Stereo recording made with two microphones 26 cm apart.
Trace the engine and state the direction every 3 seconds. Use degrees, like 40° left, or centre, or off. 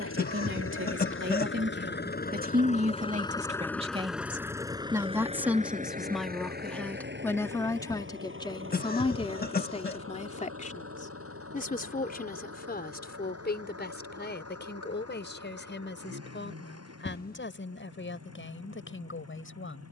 50° left, 10° right, 40° right, 60° right, 60° right, 70° right, 70° right.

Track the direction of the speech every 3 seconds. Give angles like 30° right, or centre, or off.
40° right, 20° right, 10° left, 30° left, 40° left, 50° left, 50° left.